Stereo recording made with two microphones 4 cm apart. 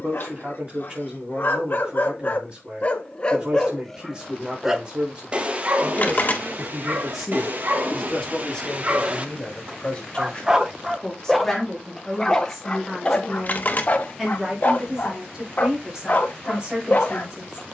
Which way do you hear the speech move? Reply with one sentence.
You can hear the speech go left and come back.